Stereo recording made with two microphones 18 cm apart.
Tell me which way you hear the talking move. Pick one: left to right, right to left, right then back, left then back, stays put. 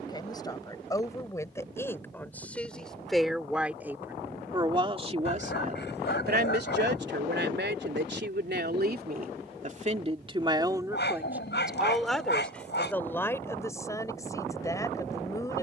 right then back.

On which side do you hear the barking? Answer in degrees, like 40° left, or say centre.
70° left.